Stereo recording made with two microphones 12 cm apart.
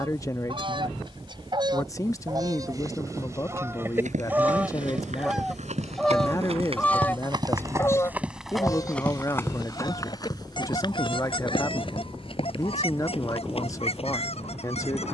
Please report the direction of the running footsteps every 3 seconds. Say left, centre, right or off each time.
off, right, right, left, left.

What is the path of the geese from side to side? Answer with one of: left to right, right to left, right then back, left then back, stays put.
right to left.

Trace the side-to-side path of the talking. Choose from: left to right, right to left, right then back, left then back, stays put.
stays put.